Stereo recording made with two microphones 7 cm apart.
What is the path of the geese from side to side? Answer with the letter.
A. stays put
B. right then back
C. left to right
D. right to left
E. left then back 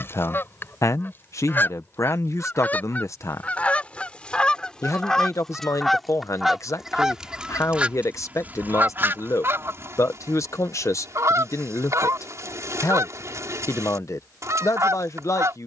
C.